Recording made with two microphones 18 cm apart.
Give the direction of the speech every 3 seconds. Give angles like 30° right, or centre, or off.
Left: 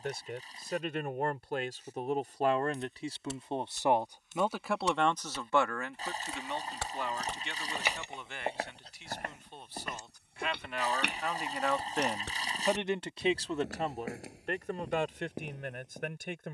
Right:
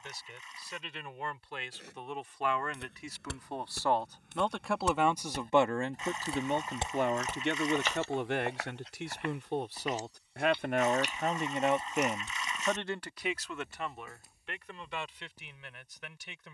40° left, centre, 60° right, 50° right, 30° left, 50° left.